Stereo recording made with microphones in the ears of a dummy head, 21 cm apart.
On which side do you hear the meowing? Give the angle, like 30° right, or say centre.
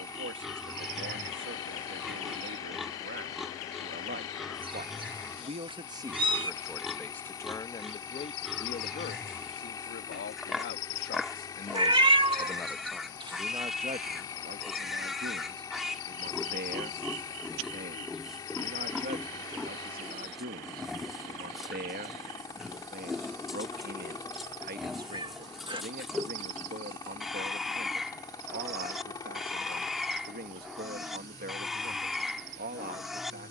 20° right.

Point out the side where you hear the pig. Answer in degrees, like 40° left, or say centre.
centre.